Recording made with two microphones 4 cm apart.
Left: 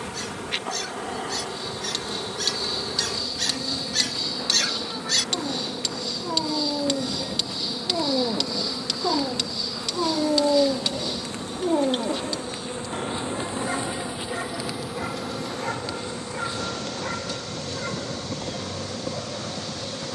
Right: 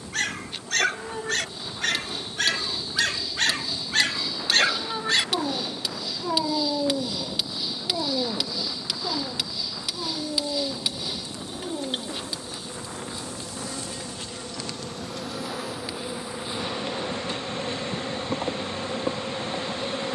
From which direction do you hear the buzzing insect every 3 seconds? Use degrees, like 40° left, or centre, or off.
70° left, 70° left, 70° left, 50° left, 20° left, 20° right, 30° right.